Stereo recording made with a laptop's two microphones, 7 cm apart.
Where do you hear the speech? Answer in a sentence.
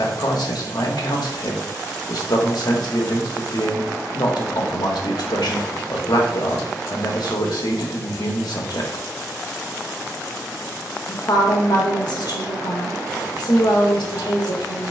In this clip you hear the speech on the left.